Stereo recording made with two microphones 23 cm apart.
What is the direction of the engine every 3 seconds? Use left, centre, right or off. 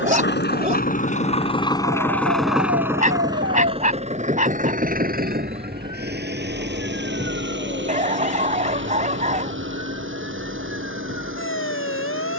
left, right, right, right.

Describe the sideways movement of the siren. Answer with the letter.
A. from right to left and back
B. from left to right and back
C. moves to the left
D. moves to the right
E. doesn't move
C.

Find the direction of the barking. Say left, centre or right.
right.